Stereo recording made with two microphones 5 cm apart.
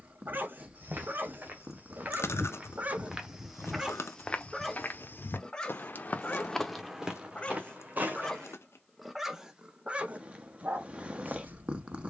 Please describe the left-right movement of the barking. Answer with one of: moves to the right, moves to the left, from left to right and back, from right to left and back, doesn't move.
from right to left and back.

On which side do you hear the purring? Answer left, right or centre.
right.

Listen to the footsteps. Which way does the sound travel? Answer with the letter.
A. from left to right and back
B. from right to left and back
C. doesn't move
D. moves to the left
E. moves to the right
B.